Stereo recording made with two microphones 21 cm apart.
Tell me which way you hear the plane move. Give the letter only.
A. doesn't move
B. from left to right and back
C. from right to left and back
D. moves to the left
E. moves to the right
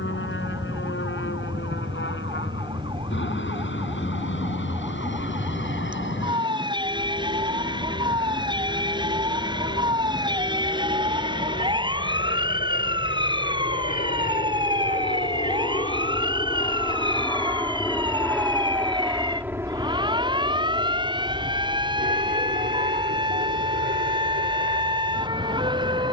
E.